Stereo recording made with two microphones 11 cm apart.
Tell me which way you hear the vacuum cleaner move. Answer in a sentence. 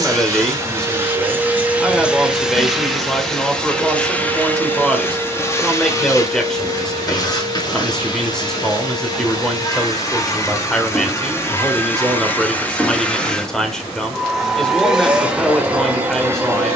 In this clip you hear the vacuum cleaner move from right to left and back again.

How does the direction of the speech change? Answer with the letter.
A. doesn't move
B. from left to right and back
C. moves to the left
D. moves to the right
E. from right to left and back
A.